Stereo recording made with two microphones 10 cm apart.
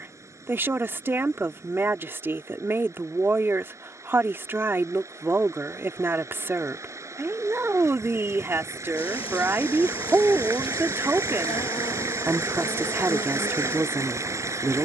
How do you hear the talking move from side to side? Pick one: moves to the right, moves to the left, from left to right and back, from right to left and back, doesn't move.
doesn't move.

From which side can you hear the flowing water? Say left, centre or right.
right.